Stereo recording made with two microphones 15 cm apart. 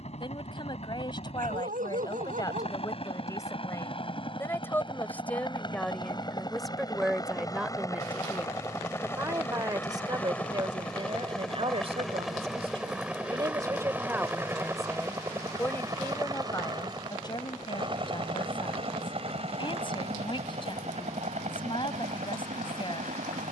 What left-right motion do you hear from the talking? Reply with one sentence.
In this clip you hear the talking move from left to right and back again.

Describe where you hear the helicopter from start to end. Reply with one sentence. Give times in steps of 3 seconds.
In this clip you hear the helicopter on the left from 0 s, in the centre from 9 s and on the right from 15 s.